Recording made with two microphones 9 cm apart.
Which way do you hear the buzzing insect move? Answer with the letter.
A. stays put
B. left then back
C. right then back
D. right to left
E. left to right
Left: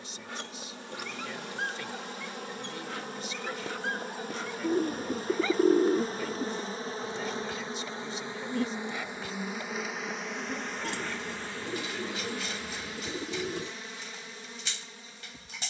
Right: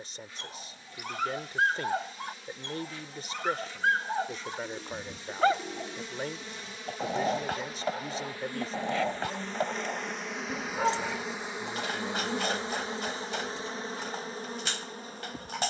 E.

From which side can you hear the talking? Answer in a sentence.
You can hear the talking on the right.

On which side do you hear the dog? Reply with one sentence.
You can hear the dog on the right.